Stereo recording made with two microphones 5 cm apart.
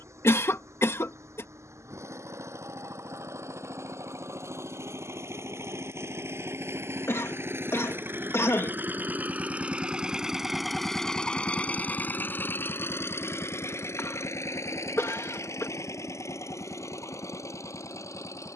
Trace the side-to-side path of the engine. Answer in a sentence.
In this clip you hear the engine go from the right side to the left.